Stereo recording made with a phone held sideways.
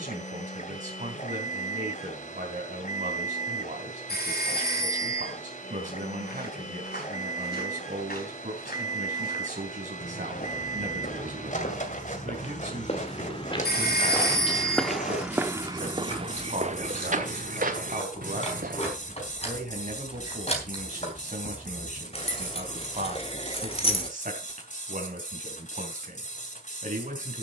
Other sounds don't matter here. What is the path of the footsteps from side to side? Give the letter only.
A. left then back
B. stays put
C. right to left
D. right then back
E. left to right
E.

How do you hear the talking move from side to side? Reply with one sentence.
You can hear the talking stay put.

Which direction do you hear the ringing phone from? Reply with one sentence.
You can hear the ringing phone on the left.